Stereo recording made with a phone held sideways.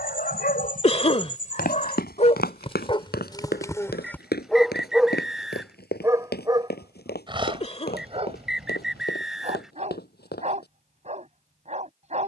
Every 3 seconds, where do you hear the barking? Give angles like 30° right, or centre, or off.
50° left, 10° left, 30° right, 40° right.